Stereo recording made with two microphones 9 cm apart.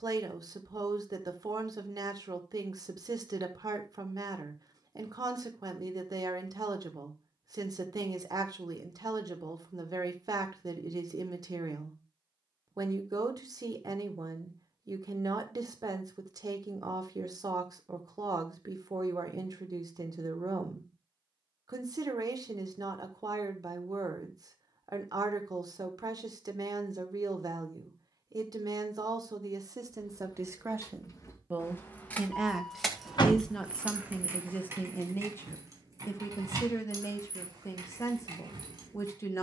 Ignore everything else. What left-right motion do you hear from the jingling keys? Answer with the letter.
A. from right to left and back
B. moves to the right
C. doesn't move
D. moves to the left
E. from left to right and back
B.